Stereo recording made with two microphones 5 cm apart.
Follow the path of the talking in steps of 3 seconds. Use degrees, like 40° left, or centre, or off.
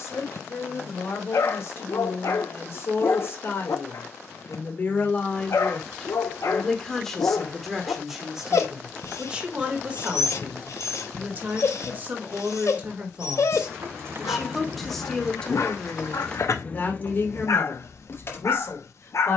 60° left, 40° left, centre, 30° right, 20° right, 30° left, 50° left.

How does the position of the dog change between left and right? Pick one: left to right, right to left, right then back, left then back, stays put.
stays put.